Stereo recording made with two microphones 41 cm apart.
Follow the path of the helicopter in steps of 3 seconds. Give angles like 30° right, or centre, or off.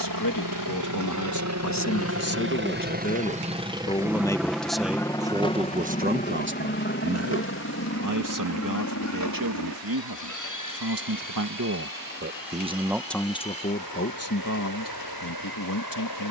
40° right, centre, 30° left, 40° left, 50° left, 60° left.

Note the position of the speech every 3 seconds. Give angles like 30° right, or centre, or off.
40° left, centre, 40° right, 50° right, 10° left, 50° left.